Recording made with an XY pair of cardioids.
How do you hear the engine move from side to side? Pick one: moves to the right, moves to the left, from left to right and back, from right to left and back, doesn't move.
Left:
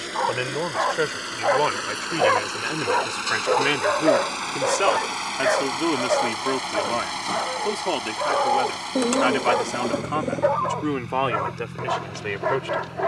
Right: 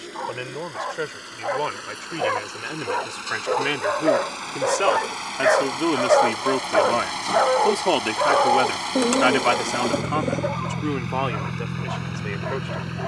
moves to the right.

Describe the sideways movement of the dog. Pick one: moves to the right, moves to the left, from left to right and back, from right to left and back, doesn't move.
from left to right and back.